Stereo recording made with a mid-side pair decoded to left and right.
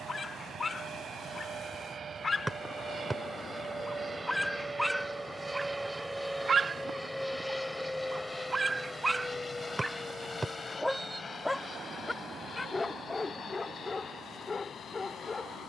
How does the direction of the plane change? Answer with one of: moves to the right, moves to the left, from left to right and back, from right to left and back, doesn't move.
moves to the left.